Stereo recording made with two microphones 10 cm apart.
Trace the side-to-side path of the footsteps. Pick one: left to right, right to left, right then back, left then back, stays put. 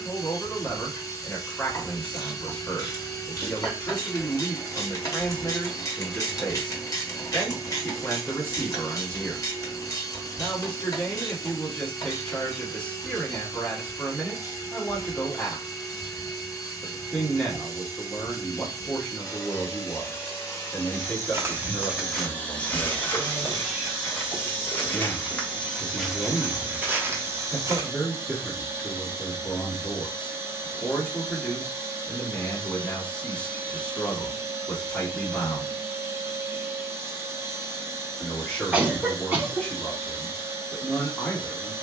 left then back.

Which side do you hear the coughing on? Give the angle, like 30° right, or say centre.
10° right.